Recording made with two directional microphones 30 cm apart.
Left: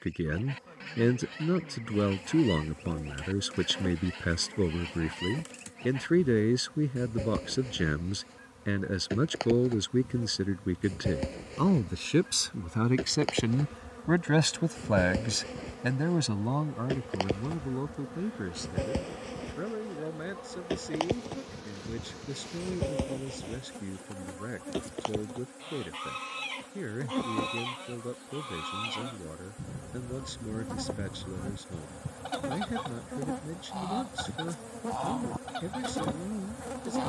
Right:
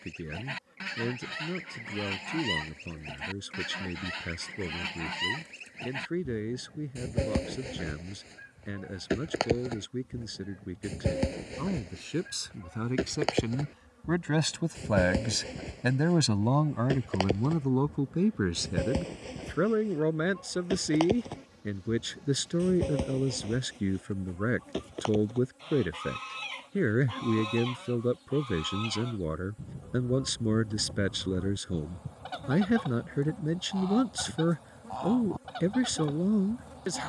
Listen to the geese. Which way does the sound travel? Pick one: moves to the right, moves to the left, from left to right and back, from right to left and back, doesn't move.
moves to the left.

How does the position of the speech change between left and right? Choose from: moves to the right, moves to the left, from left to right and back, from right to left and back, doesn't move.
moves to the right.